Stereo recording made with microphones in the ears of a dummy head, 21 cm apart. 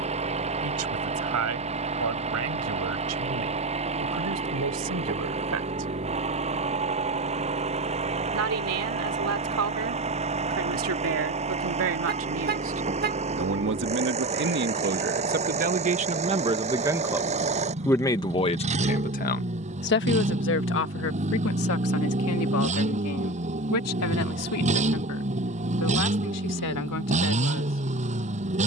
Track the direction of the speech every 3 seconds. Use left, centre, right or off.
right, right, right, right, right, right, left, left, left, left.